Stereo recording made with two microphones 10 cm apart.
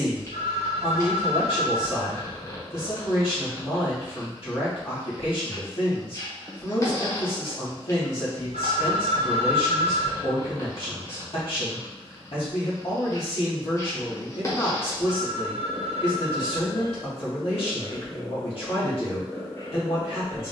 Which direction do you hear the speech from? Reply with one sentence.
You can hear the speech on the left.